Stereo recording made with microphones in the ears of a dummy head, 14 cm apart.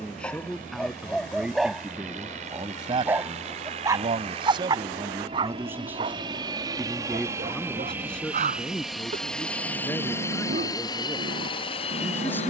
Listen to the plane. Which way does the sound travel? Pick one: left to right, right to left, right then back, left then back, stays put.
right to left.